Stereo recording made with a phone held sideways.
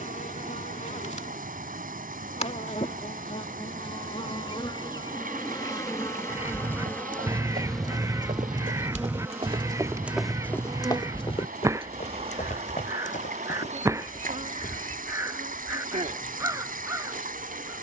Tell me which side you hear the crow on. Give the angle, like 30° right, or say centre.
20° right.